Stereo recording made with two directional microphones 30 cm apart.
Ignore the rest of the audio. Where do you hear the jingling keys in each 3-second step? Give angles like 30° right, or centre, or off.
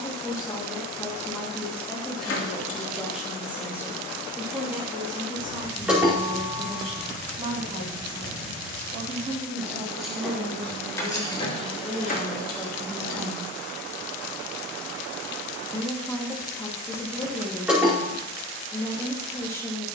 40° left, 20° left, 10° right, 10° left, 30° left, off, off.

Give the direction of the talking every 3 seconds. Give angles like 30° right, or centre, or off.
10° left, 10° right, 20° right, 20° right, centre, 10° left, 10° left.